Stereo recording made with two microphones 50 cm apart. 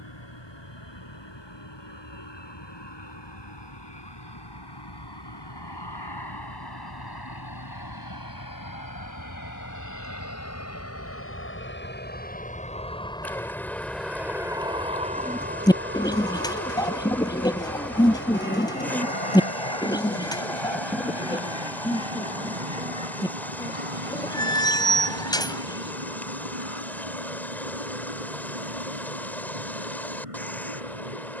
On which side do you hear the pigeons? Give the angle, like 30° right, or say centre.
10° left.